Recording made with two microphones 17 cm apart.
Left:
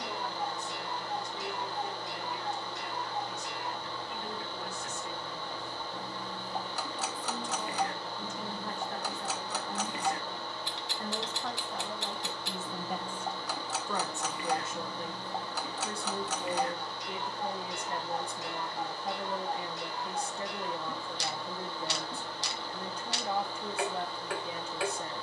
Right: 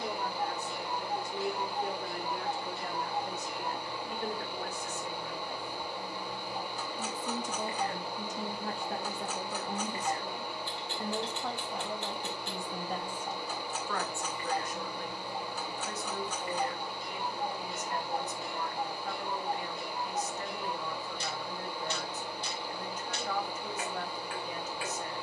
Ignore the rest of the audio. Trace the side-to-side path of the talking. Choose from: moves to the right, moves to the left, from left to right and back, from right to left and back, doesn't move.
moves to the left.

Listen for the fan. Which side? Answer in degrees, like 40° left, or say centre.
10° right.